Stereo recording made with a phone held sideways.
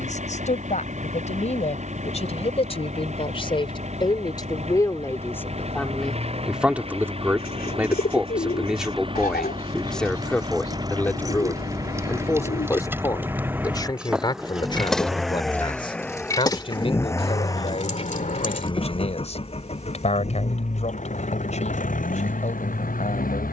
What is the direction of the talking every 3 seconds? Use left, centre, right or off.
left, left, centre, centre, left, left, left, left.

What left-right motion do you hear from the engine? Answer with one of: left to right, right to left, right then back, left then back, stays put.
right to left.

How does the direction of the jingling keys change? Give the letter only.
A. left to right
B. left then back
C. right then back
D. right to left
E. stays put
D.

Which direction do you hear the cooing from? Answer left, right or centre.
left.